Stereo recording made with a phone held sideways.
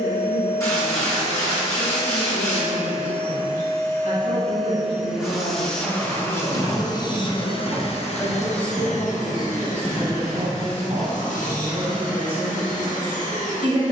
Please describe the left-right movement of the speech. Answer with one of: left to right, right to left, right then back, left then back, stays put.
left to right.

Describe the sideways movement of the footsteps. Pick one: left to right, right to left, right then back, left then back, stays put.
right to left.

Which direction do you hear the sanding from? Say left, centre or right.
left.